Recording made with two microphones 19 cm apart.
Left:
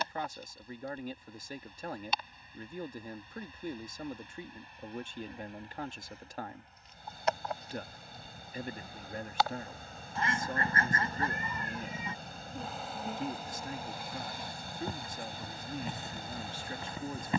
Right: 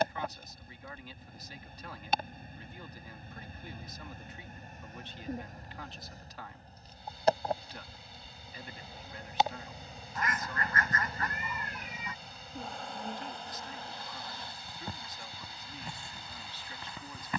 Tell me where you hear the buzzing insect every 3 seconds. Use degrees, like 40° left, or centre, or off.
50° right, 50° right, 30° right, 10° right, 10° left, 20° left.